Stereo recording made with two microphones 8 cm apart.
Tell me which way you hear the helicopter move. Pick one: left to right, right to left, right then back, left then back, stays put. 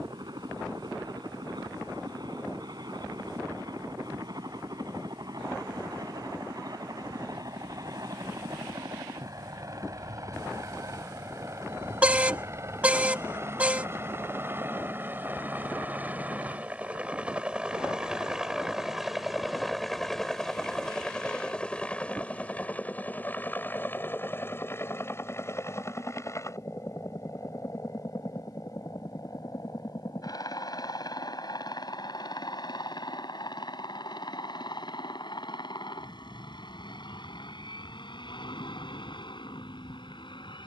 right to left.